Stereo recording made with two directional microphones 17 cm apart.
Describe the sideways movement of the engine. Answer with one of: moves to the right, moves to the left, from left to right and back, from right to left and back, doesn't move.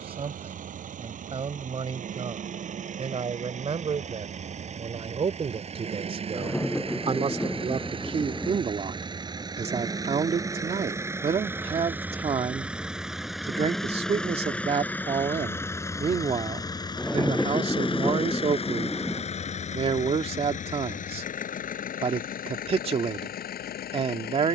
moves to the left.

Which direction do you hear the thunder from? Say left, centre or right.
centre.